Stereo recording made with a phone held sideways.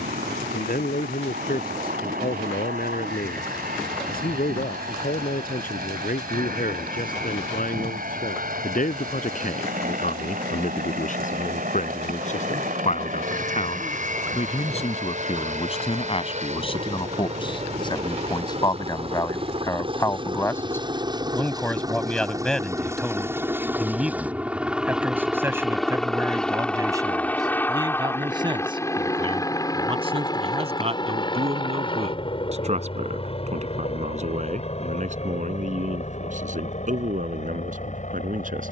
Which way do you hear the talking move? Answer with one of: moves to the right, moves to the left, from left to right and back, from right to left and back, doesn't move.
moves to the right.